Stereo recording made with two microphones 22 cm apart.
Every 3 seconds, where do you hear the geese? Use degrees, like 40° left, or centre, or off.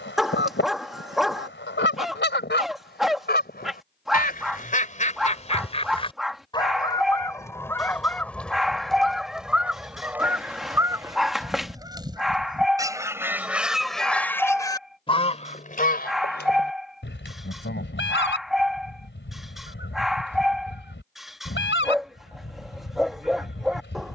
60° left, 40° left, 10° left, 10° right, 10° right, 50° left, 60° left, 60° left.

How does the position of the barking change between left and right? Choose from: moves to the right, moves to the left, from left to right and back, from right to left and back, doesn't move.
doesn't move.